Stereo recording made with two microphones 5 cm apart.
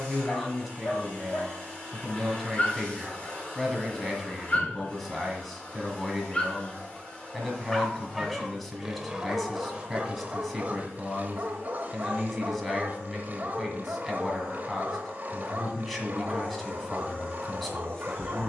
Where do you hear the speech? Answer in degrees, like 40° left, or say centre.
centre.